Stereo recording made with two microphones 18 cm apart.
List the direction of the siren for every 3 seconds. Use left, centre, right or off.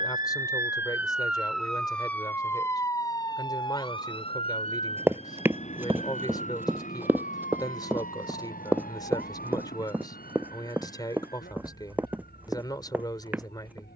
centre, left, left, left, left.